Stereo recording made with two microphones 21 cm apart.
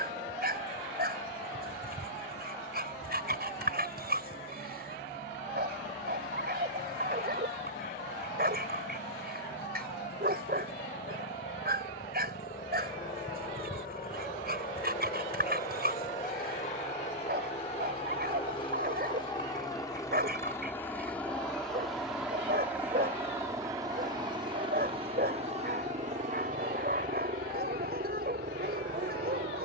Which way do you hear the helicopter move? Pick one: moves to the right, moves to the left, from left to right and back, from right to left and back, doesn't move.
moves to the right.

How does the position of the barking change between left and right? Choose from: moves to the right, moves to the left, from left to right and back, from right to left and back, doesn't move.
doesn't move.